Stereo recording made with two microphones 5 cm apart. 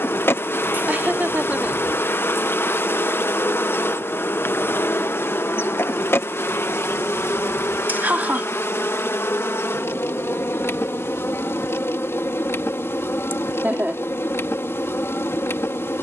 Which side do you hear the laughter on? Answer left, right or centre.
right.